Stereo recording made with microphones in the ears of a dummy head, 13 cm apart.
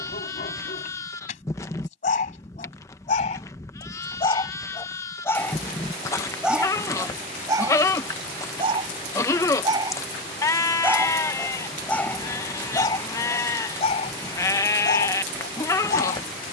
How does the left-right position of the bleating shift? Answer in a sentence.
In this clip you hear the bleating stay put.